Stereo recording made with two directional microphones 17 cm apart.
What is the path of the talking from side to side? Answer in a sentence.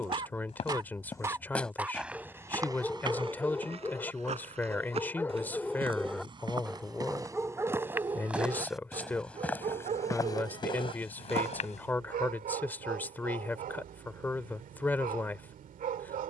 You can hear the talking stay put.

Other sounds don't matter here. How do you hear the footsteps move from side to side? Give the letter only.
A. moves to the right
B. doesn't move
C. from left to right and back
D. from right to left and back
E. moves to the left
C.